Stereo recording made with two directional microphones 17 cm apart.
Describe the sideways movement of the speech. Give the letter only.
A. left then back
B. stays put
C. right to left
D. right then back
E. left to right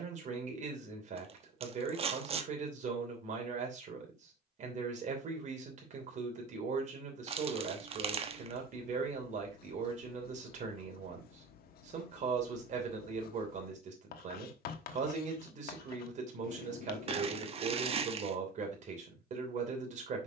B.